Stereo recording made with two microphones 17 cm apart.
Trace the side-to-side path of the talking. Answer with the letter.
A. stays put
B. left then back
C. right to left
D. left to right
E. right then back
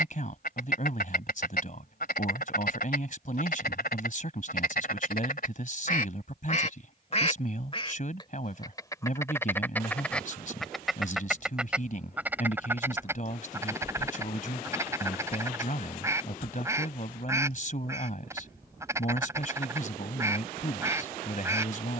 A.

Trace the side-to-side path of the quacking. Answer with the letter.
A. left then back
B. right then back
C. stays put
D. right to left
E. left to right
E.